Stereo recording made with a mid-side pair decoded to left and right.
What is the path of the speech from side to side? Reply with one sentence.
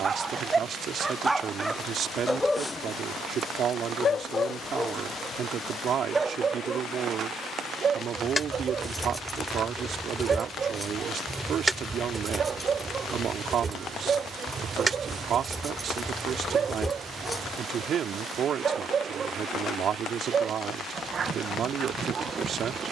You can hear the speech stay put.